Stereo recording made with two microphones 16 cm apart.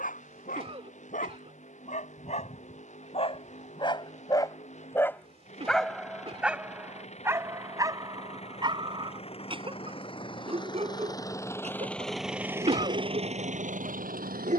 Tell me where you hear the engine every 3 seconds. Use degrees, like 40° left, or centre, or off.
60° left, 50° left, 50° left, 30° left, 40° right.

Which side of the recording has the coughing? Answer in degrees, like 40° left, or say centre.
40° right.